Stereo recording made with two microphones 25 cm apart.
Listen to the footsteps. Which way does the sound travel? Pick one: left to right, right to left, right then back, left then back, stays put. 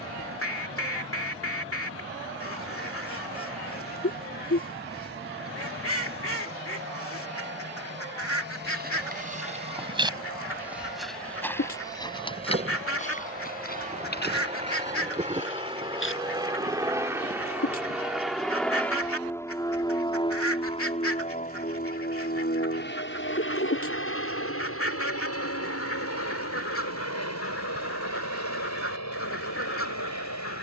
right to left.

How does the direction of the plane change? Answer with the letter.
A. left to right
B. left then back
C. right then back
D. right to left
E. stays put
D.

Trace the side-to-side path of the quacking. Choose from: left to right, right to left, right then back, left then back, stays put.
stays put.